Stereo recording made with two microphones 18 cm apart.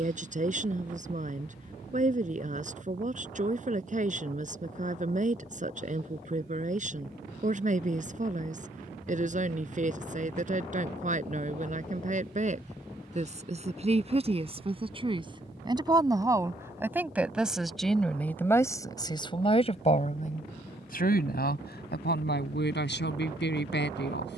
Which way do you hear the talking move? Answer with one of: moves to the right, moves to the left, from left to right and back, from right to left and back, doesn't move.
moves to the left.